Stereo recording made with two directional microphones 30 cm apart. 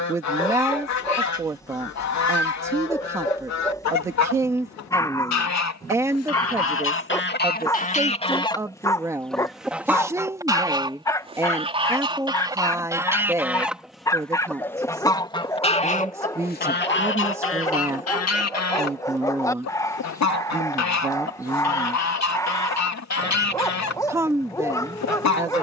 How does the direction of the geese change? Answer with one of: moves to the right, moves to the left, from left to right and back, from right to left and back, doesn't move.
from left to right and back.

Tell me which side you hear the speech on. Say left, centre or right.
centre.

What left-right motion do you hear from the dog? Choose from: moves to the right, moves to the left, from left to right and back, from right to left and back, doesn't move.
doesn't move.